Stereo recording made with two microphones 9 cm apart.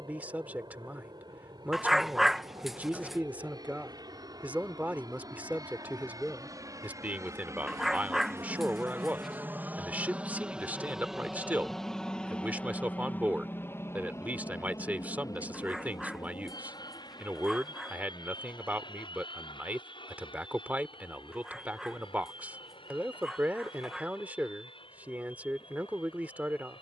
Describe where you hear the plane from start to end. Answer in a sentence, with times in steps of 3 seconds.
In this clip you hear the plane on the right from 0 s, in the centre from 9 s and on the left from 12 s.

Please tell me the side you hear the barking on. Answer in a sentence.
In this clip you hear the barking in the centre.